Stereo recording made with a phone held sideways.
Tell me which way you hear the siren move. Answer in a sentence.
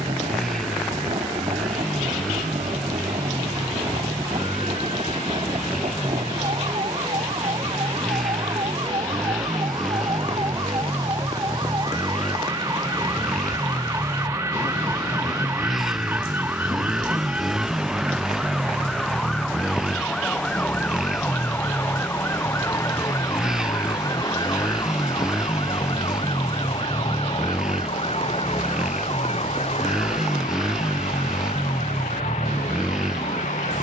In this clip you hear the siren travel towards the left.